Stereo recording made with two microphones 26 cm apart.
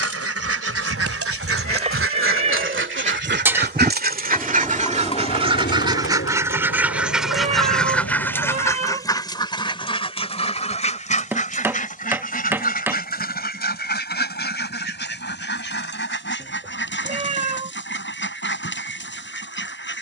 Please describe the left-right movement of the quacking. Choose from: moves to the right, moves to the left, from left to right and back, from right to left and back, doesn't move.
moves to the left.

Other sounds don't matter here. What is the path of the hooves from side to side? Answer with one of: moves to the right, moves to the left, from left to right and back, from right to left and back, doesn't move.
moves to the left.